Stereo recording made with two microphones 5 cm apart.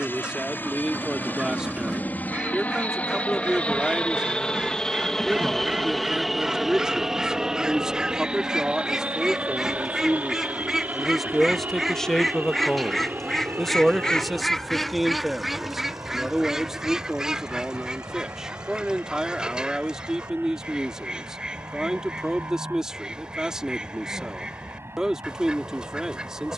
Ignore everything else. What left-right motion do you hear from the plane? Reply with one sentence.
In this clip you hear the plane go from the left side to the right.